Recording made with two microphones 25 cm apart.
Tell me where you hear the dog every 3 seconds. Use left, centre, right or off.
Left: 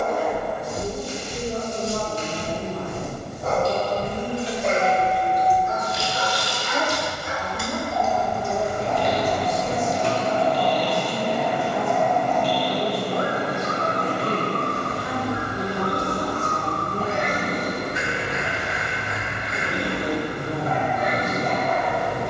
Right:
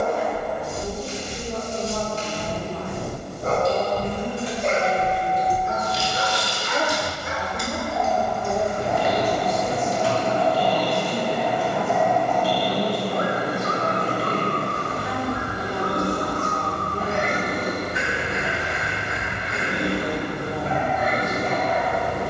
right, right, right, left, left, centre, right, right.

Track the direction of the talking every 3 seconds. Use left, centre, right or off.
left, centre, right, right, centre, left, left, left.